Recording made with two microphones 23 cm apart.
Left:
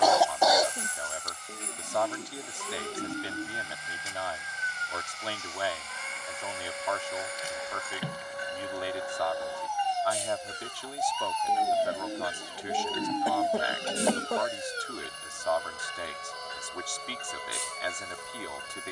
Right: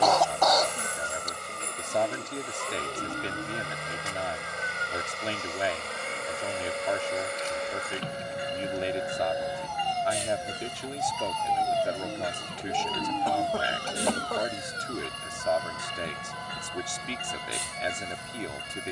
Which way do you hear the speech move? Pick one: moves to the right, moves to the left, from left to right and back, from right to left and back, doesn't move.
doesn't move.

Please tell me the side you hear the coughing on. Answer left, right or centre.
centre.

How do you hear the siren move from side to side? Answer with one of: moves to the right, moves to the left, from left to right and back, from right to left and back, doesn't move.
moves to the left.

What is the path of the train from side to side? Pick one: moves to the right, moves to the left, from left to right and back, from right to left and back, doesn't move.
doesn't move.